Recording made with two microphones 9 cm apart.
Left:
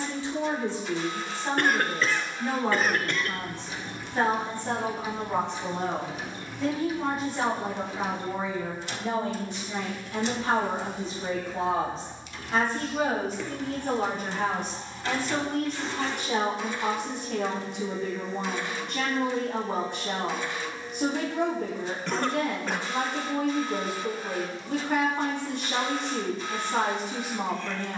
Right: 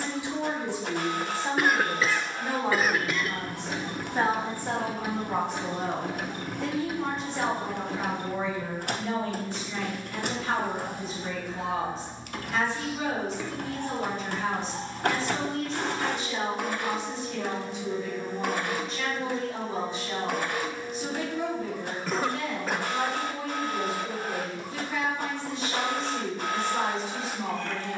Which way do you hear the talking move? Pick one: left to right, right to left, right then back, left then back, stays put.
right to left.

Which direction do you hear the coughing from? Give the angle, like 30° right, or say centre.
centre.